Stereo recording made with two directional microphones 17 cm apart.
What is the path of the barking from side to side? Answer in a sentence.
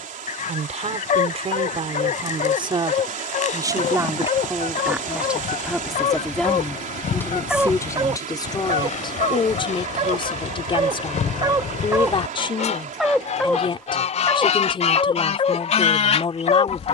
You can hear the barking go right and come back.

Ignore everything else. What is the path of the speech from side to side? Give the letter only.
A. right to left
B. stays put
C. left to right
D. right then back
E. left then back
A.